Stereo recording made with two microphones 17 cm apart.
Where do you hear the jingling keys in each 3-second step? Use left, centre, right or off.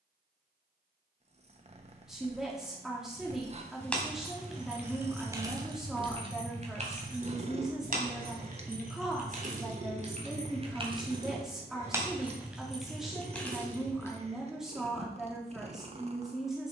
off, centre, right, right, centre, off.